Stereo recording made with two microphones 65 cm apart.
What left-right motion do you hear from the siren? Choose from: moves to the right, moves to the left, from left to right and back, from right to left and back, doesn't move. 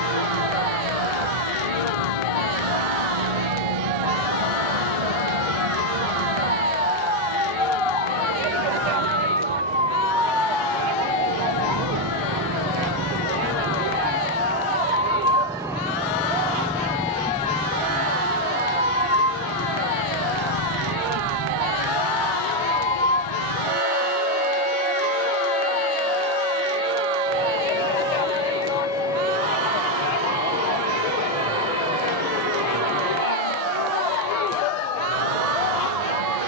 moves to the left.